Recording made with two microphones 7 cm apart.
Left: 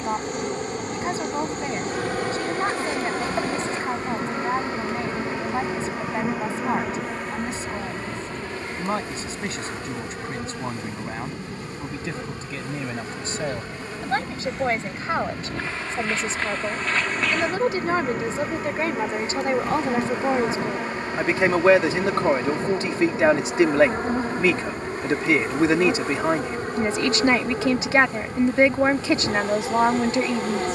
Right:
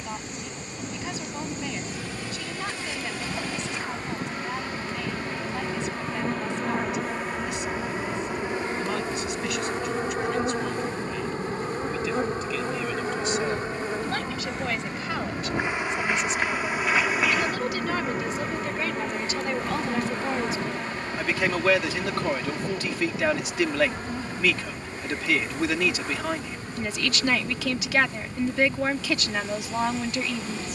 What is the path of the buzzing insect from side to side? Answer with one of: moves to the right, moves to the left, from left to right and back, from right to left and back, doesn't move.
from left to right and back.